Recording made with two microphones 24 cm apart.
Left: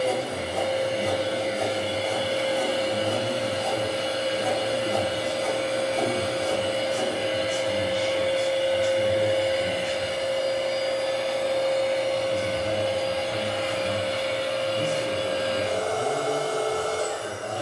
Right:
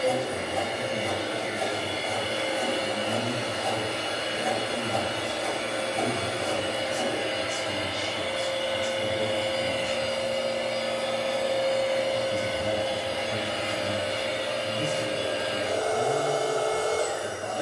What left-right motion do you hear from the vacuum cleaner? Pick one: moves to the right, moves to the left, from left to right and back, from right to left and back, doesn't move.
moves to the right.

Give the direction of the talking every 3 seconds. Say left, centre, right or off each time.
left, left, left, left, centre, left.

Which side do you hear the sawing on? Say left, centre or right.
left.